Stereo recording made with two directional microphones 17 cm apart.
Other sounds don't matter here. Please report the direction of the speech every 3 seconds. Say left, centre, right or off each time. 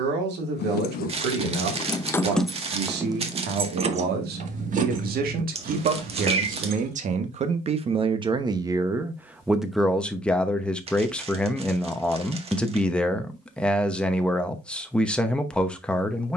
right, right, right, centre, centre, centre.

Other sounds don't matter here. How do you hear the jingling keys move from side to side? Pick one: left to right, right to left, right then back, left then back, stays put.
left to right.